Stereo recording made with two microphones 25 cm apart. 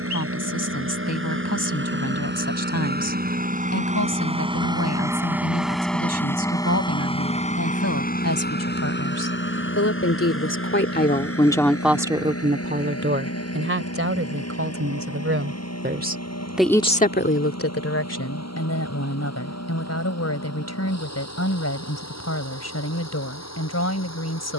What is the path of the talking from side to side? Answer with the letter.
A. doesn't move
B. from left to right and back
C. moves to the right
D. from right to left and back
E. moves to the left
B.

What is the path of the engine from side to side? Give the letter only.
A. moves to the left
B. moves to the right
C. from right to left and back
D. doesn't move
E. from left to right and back
A.